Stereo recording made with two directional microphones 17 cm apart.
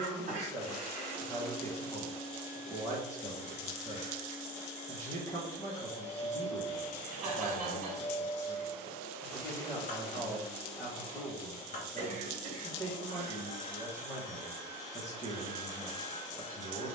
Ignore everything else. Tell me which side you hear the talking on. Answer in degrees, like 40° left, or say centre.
20° left.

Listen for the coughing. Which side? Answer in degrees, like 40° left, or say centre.
50° right.